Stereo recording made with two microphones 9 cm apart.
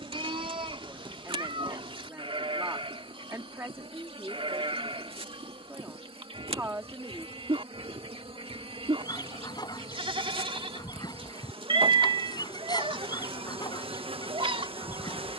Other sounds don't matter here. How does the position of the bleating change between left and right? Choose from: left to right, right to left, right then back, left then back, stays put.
stays put.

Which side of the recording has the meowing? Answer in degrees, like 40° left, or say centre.
60° right.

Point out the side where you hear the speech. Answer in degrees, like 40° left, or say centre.
30° right.